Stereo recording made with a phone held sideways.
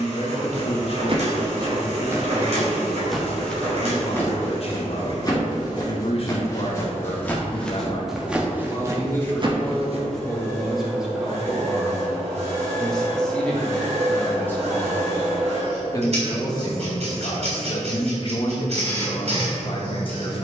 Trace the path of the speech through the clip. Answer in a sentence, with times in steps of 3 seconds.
You can hear the speech on the left from 0 s, in the centre from 9 s and on the left from 15 s.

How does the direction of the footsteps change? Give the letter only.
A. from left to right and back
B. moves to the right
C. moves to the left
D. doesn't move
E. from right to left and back
E.